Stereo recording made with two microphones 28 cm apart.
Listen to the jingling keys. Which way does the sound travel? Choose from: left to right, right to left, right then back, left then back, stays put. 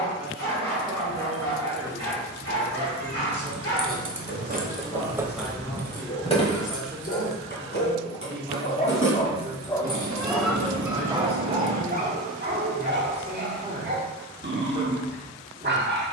right to left.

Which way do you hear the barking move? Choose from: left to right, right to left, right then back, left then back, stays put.
left to right.